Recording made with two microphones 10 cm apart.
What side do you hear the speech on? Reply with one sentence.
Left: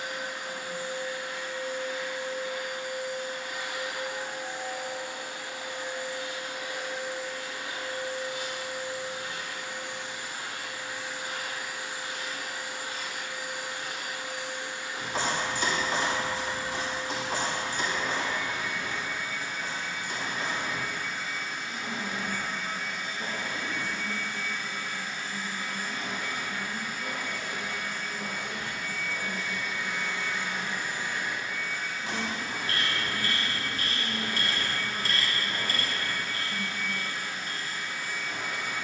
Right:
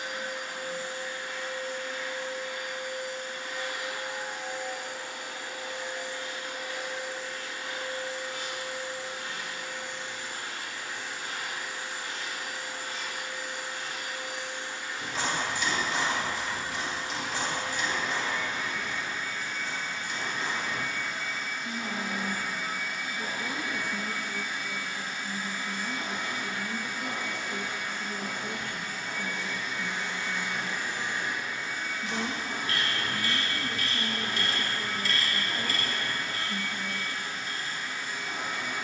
You can hear the speech on the right.